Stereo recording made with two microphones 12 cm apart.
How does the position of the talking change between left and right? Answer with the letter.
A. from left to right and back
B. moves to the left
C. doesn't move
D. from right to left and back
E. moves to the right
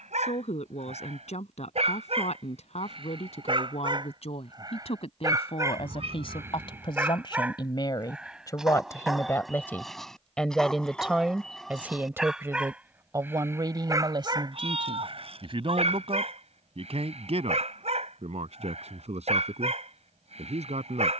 E.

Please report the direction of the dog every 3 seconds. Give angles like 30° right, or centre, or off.
60° right, 40° right, 10° right, centre, 20° right, 60° right, 60° right.